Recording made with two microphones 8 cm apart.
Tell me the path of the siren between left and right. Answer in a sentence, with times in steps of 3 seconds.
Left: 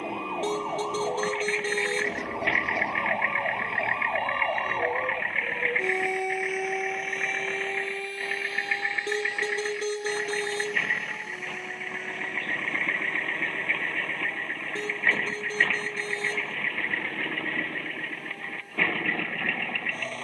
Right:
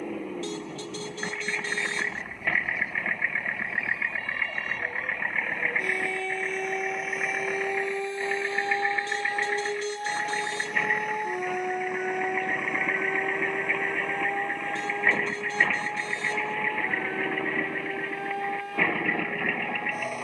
In this clip you hear the siren on the left from 0 s, in the centre from 6 s and on the right from 9 s.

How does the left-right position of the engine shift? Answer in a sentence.
You can hear the engine stay put.